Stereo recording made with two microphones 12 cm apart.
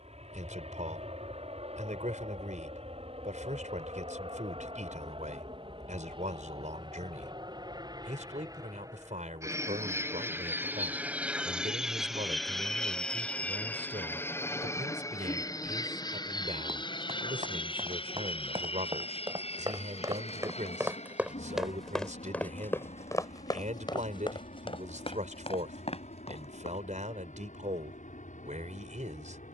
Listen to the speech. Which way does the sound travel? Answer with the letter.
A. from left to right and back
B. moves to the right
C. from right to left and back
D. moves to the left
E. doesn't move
E.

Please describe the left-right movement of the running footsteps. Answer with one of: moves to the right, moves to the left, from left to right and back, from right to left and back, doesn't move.
moves to the left.